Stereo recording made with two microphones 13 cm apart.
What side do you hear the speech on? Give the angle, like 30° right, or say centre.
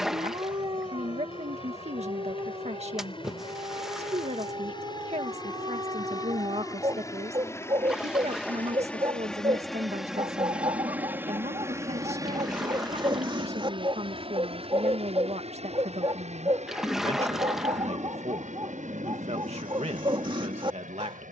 60° right.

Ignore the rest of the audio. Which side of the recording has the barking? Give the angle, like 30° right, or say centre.
40° right.